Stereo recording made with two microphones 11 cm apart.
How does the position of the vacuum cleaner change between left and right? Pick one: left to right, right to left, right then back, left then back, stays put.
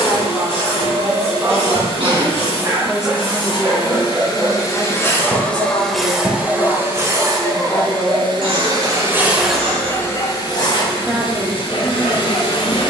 right then back.